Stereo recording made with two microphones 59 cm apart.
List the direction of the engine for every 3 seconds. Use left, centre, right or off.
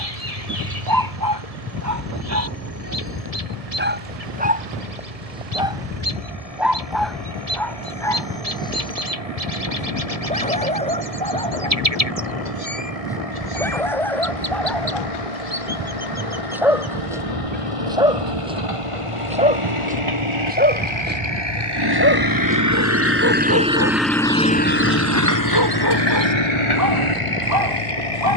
right, right, right, right, right, right, right, right, left, left.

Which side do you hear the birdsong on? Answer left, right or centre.
right.